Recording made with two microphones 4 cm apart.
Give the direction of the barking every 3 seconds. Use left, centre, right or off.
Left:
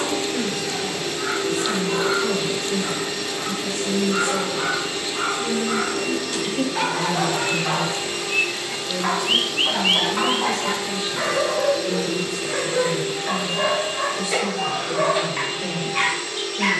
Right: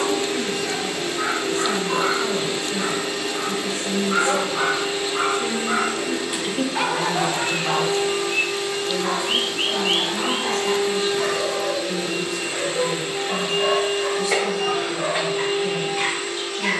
right, right, centre, left, left, left.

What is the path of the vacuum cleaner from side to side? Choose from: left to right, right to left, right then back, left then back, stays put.
stays put.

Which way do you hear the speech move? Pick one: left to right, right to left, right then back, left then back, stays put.
right then back.